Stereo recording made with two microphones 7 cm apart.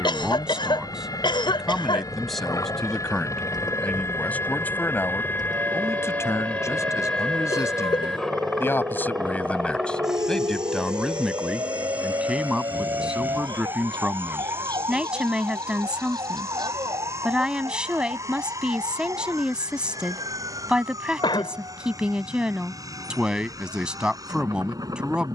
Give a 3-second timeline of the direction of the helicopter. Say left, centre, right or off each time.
left, left, centre, centre, right, right, right, right, right.